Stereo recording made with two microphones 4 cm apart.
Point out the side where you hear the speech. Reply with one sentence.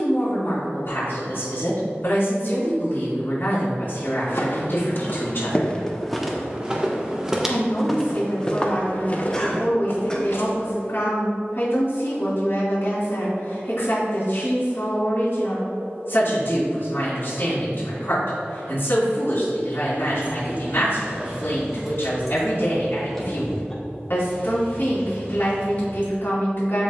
You can hear the speech on the left.